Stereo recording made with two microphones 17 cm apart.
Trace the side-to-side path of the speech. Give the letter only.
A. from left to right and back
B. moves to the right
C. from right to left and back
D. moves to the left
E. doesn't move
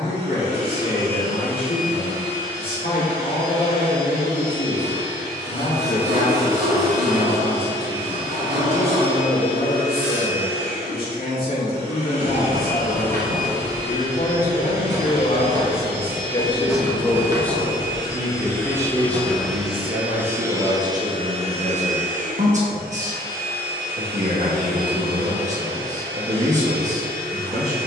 B.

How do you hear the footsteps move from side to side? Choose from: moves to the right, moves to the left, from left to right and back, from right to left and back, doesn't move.
from right to left and back.